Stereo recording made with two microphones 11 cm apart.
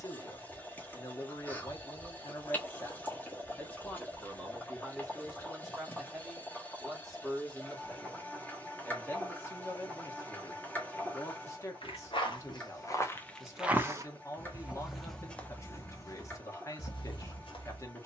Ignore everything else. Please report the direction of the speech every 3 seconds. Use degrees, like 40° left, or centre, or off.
30° left, 10° left, centre, 30° left, 30° left, 30° left.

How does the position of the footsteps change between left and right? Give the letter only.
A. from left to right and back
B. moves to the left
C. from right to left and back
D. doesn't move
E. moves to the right
A.